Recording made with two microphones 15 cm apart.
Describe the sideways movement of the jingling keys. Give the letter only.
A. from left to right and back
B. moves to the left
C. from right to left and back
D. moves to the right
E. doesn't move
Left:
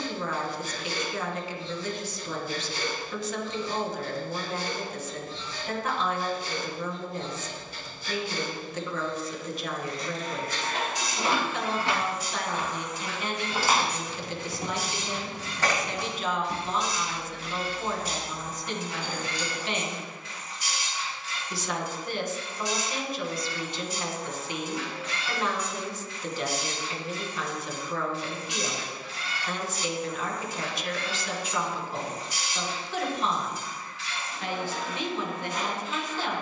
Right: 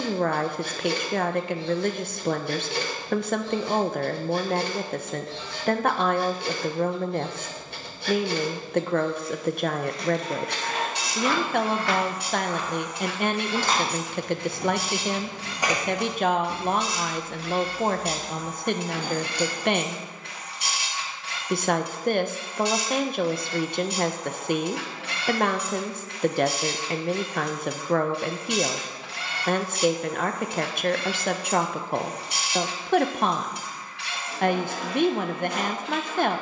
D.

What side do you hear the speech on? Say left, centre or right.
right.